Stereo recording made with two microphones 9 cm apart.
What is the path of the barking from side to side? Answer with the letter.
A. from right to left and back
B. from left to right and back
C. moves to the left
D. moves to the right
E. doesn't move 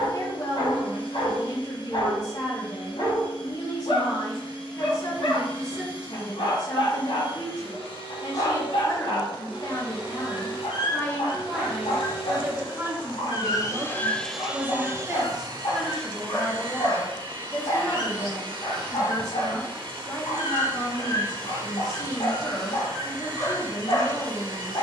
E.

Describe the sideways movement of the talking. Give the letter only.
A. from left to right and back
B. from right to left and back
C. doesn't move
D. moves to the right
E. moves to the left
A.